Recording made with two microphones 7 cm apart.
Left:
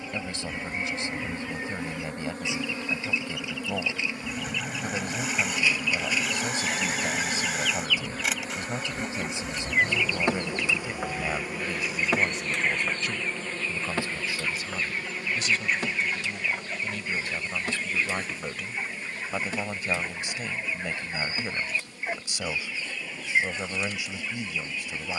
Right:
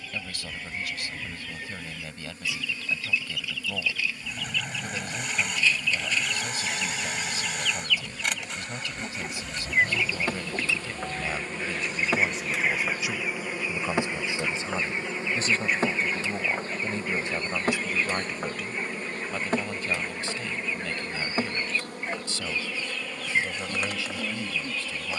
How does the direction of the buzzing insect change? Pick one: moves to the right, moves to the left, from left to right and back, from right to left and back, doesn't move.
moves to the right.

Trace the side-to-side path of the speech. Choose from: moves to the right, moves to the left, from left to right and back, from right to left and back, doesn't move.
from left to right and back.